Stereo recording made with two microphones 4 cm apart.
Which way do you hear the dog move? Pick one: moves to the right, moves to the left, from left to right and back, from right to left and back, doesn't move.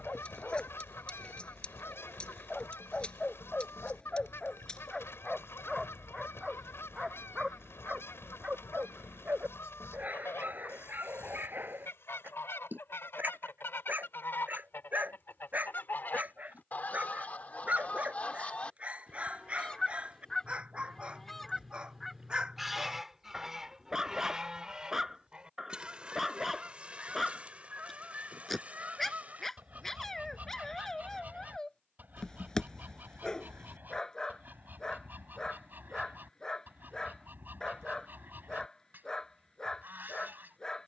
from left to right and back.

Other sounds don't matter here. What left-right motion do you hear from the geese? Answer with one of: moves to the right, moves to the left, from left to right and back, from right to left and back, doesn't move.
moves to the right.